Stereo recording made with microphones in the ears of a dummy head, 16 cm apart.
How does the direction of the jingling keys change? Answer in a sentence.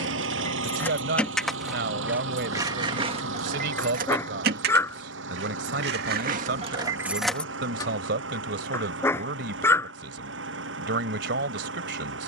In this clip you hear the jingling keys go right and come back.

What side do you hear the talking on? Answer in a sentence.
You can hear the talking on the right.